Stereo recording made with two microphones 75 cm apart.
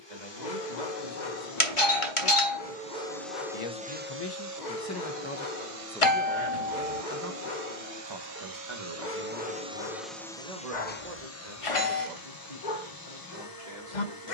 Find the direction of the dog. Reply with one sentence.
In this clip you hear the dog on the left.